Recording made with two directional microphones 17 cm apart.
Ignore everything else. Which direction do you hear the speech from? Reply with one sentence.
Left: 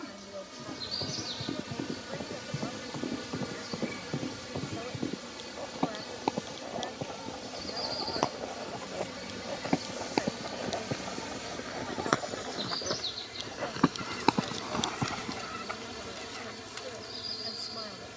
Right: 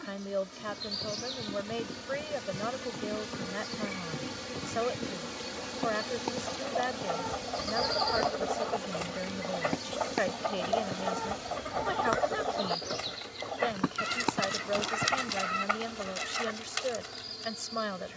In this clip you hear the speech on the right.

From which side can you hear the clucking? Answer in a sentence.
You can hear the clucking on the right.